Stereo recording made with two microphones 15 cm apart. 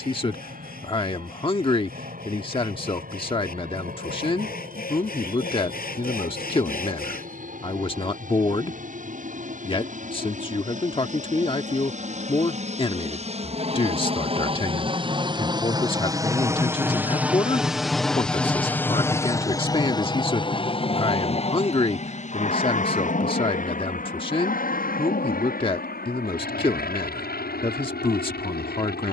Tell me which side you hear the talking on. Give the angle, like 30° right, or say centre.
30° left.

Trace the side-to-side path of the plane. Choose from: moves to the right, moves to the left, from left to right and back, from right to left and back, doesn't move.
moves to the left.